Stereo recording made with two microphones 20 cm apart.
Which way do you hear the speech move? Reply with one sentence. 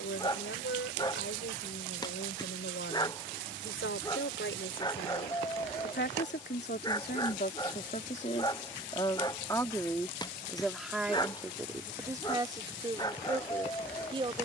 You can hear the speech move to the right.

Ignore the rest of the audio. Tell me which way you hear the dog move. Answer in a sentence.
You can hear the dog stay in one place.